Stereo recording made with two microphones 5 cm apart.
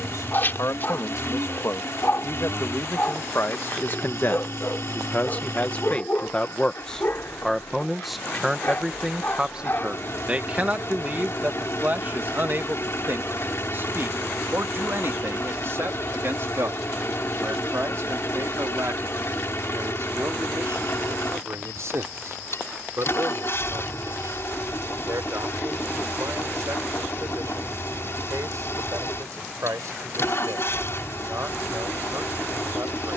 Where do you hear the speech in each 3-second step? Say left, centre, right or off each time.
left, left, centre, right, right, right, right, right, right, right, right.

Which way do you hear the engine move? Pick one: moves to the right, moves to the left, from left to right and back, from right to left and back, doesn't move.
doesn't move.